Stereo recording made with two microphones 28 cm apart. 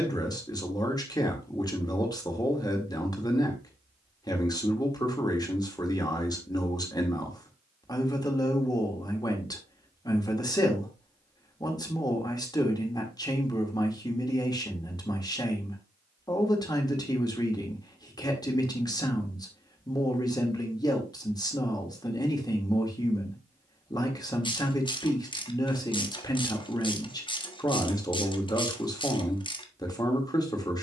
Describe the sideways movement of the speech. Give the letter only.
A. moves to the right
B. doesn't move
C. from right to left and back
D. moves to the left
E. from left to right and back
B.